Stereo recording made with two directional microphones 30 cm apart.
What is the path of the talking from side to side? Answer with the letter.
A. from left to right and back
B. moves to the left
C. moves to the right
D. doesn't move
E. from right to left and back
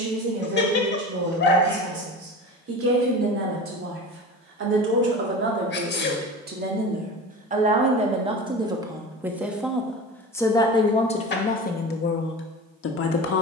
B.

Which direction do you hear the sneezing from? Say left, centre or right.
left.